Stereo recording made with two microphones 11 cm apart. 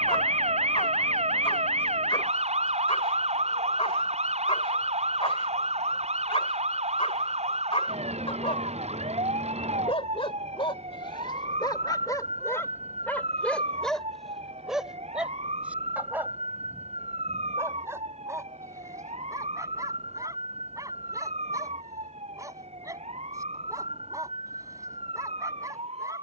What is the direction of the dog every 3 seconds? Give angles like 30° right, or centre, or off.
60° left, 60° left, 60° left, 50° left, 10° left, 20° right, 30° right, 30° right, 30° right.